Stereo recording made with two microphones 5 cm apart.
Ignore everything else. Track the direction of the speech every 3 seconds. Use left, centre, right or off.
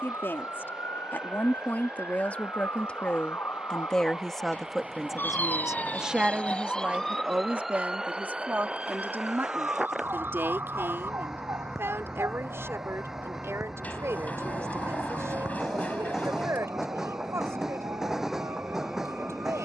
left, centre, right, right, right, right, right.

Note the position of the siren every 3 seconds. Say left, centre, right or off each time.
left, left, centre, right, right, right, right.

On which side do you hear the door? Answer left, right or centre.
left.